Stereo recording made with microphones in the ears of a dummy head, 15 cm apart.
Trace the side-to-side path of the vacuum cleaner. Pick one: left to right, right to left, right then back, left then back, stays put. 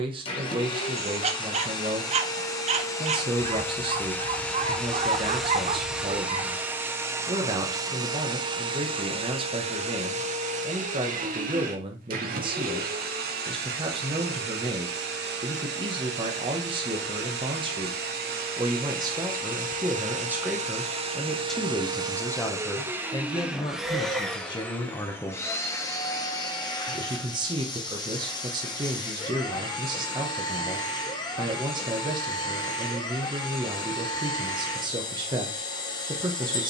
right then back.